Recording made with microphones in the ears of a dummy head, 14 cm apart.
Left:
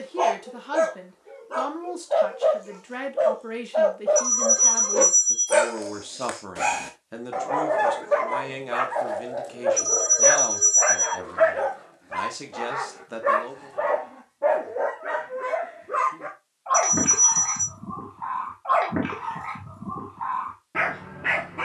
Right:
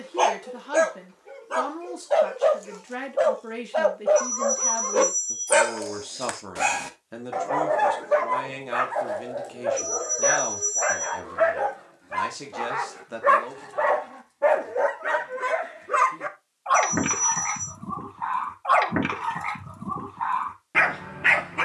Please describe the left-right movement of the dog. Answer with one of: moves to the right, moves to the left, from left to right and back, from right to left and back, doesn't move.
from right to left and back.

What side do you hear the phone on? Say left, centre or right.
left.